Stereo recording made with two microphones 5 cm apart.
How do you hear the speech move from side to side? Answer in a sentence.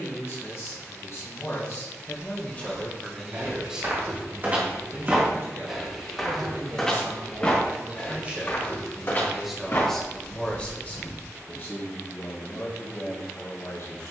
You can hear the speech go right and come back.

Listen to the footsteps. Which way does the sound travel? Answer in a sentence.
In this clip you hear the footsteps go from the right side to the left.